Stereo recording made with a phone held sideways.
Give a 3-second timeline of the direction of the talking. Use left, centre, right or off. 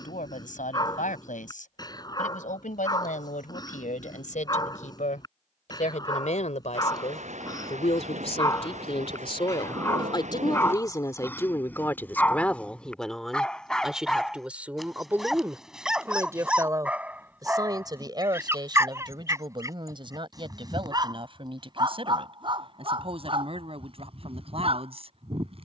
left, left, left, left, centre, right, right, right, right.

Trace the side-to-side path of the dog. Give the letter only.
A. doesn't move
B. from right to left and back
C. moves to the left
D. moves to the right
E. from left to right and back
D.